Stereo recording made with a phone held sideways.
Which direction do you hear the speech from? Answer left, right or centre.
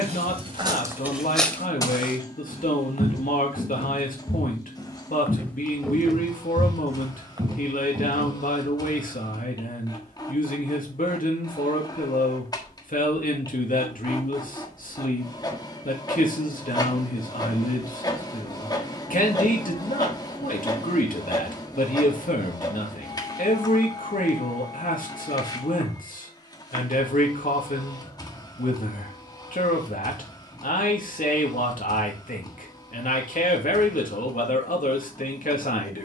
left.